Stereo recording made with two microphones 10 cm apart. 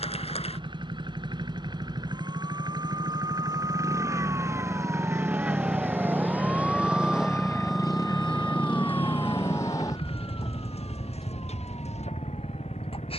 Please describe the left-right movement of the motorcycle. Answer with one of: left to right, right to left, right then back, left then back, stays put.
right to left.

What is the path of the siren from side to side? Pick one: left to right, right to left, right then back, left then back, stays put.
right to left.